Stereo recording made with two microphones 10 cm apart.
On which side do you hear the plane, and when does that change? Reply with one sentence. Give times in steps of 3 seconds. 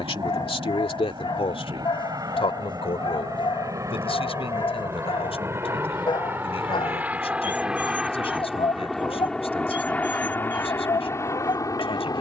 In this clip you hear the plane on the right from 0 s, in the centre from 6 s and on the left from 9 s.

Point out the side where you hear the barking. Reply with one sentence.
In this clip you hear the barking on the left.